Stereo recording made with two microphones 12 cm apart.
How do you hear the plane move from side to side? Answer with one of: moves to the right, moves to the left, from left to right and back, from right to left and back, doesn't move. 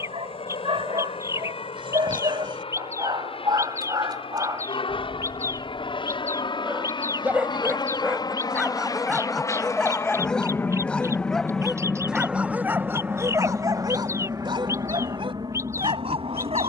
moves to the right.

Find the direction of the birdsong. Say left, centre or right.
right.